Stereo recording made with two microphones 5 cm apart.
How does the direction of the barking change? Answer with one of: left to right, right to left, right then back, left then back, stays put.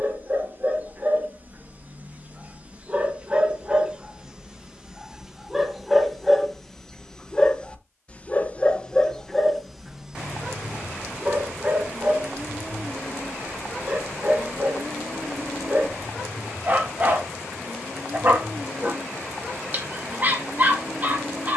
left then back.